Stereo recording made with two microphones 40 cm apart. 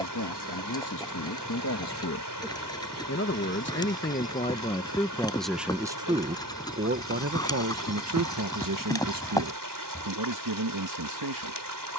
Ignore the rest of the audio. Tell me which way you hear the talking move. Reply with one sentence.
You can hear the talking travel towards the right.